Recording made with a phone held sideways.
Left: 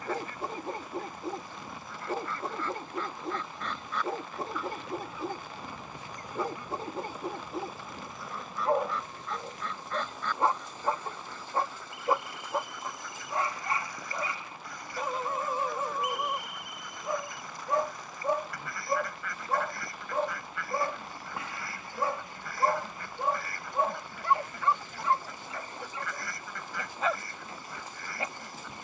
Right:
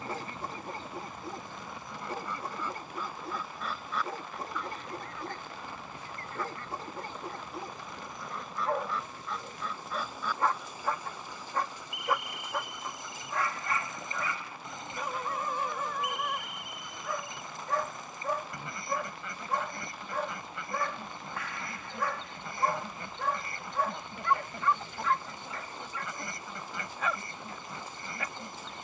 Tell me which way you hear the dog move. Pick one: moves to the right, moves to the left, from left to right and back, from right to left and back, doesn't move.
doesn't move.